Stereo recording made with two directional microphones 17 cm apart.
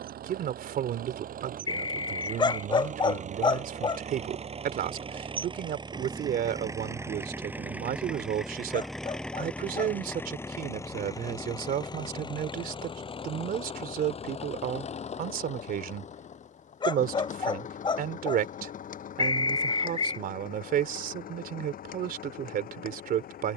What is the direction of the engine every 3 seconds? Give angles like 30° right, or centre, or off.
50° right, 40° right, 10° right, 10° left, 30° left, 40° left, 50° left, 60° left.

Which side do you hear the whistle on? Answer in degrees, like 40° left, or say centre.
30° left.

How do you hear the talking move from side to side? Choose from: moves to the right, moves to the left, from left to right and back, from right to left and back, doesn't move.
doesn't move.